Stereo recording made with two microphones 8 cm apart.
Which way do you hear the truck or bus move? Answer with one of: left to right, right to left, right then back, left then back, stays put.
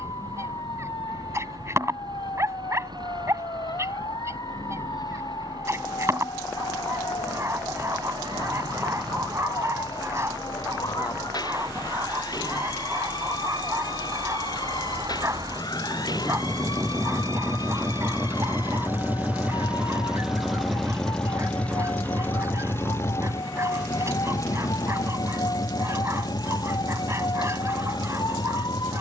right to left.